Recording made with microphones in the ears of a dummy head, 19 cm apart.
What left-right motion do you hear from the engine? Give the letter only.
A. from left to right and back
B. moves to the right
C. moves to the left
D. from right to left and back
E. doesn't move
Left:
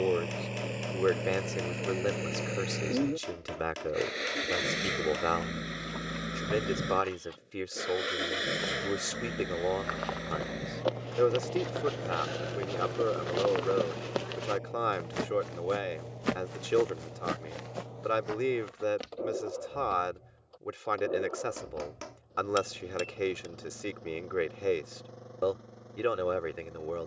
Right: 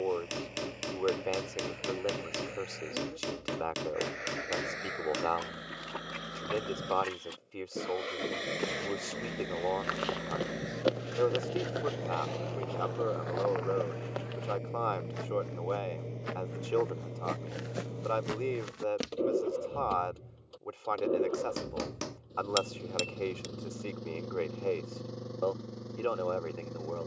B.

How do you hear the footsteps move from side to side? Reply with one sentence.
In this clip you hear the footsteps go left and come back.